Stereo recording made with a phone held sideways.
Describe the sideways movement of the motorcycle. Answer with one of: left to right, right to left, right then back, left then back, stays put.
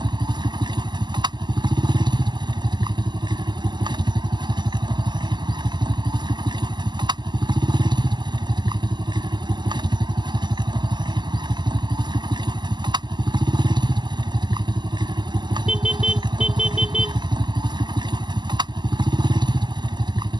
stays put.